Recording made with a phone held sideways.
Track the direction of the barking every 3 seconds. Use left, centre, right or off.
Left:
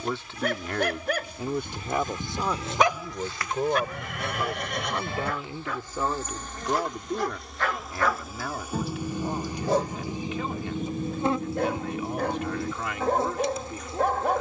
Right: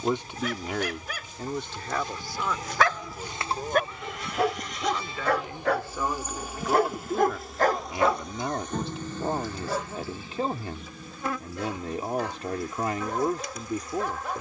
left, right, right, left, left.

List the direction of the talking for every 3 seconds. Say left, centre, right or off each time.
centre, left, centre, right, right.